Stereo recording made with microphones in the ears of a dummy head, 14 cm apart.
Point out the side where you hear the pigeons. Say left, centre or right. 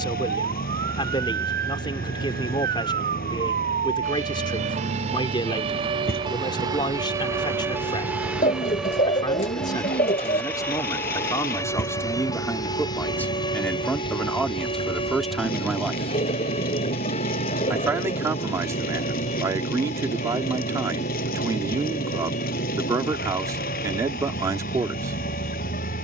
left.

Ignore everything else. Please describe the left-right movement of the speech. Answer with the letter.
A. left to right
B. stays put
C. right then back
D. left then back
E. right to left
A.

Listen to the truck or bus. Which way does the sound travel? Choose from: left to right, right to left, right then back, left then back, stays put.
stays put.